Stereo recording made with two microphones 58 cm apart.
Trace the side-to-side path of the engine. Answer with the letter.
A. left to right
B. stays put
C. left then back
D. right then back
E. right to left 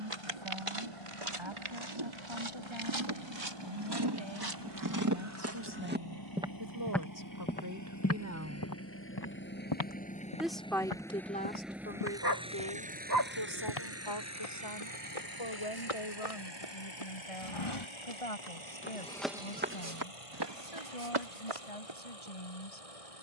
A.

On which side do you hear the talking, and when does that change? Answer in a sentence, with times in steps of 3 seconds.
In this clip you hear the talking on the right from 0 s, in the centre from 9 s and on the left from 12 s.